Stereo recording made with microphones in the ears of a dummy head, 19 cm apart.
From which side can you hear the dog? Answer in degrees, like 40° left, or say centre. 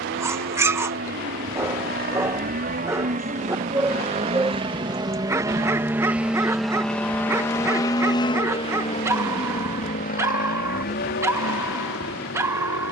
10° right.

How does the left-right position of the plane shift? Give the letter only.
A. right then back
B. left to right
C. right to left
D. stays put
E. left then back
C.